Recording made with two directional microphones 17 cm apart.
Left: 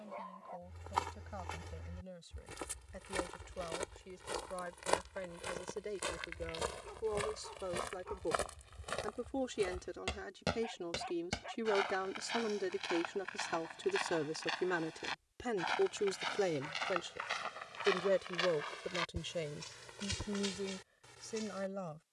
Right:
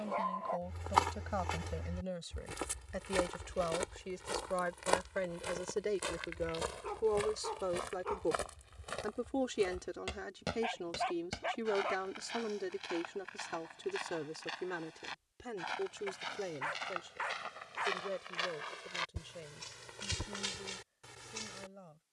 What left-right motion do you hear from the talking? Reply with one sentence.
You can hear the talking move from right to left.